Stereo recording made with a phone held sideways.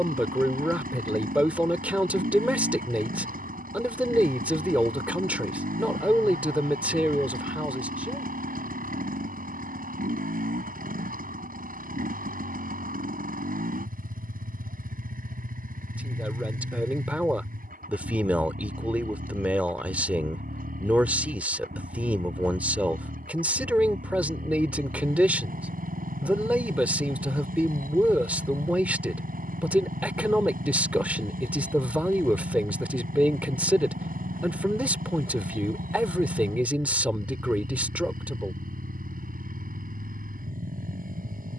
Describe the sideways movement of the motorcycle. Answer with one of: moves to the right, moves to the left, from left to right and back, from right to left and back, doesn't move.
doesn't move.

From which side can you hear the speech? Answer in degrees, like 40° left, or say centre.
10° right.